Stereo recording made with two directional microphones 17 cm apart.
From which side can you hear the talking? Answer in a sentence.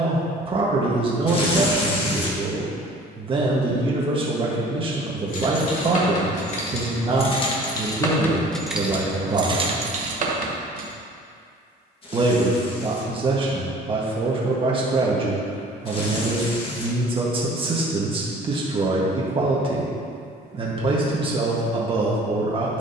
In this clip you hear the talking on the right.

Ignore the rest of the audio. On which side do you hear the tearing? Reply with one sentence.
You can hear the tearing on the left.